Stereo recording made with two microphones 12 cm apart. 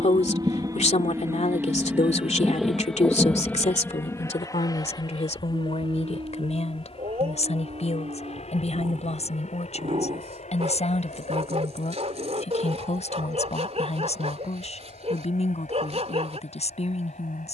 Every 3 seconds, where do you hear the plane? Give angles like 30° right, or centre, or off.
20° right, 20° left, 50° left, 60° left, 70° left, 70° left.